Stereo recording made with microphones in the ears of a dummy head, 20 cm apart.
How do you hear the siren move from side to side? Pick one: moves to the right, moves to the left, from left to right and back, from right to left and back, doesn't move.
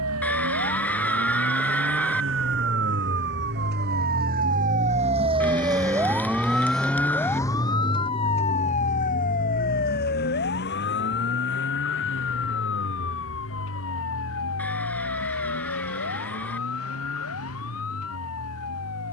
moves to the left.